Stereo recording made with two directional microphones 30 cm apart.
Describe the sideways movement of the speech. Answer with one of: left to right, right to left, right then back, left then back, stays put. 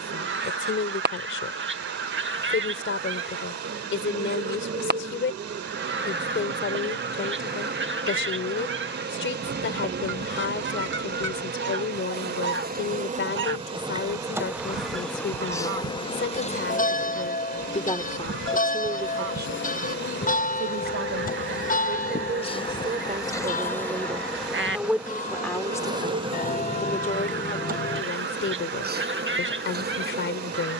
right then back.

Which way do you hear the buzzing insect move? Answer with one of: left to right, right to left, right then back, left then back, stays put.
left then back.